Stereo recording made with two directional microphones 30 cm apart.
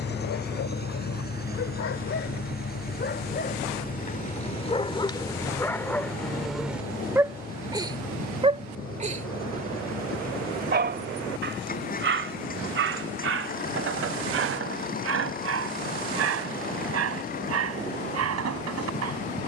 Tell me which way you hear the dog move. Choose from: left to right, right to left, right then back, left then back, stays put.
left to right.